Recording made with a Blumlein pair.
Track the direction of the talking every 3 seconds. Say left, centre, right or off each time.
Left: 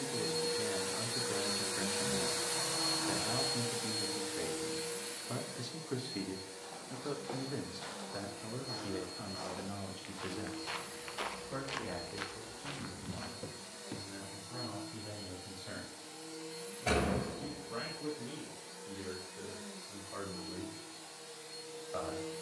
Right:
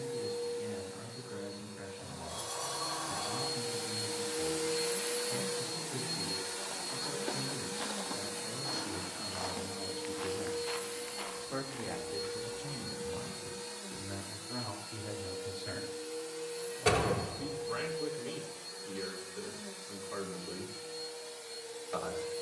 left, left, left, centre, right, right, right, right.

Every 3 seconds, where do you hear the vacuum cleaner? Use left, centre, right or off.
left, centre, right, right, right, right, right, right.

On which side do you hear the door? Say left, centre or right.
right.